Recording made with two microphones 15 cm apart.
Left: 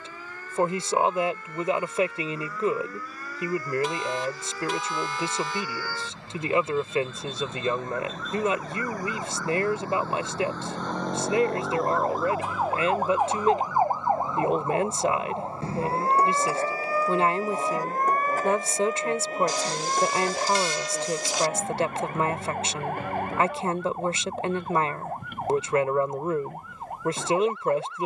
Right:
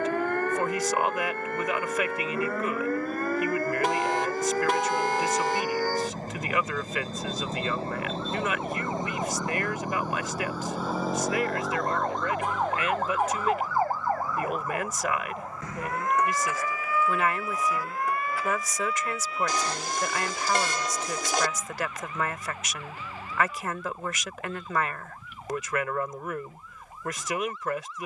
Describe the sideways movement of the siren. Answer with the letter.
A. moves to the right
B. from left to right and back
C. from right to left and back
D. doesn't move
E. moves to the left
E.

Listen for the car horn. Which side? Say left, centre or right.
right.